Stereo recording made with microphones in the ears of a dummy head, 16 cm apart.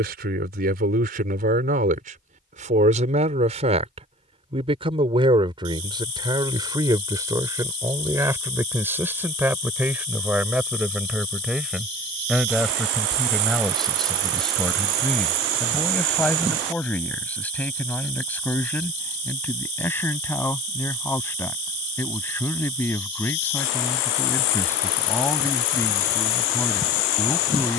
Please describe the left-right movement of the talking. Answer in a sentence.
In this clip you hear the talking travel towards the left.